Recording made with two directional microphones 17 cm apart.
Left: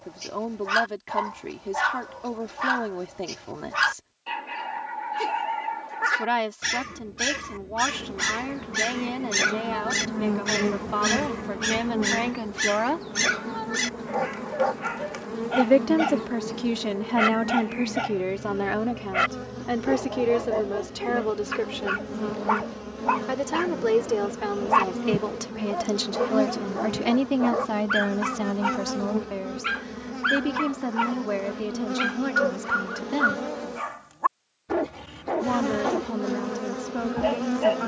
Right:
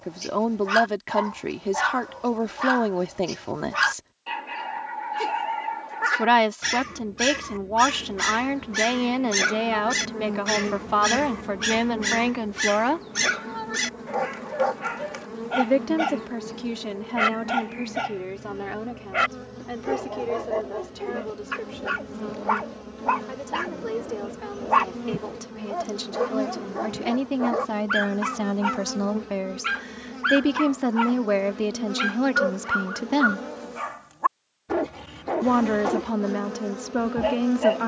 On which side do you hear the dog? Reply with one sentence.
In this clip you hear the dog in the centre.